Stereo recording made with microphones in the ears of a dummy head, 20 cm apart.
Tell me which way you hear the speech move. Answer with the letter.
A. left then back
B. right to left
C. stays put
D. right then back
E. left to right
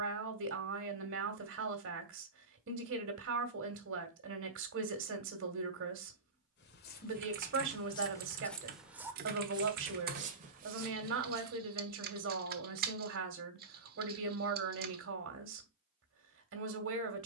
C.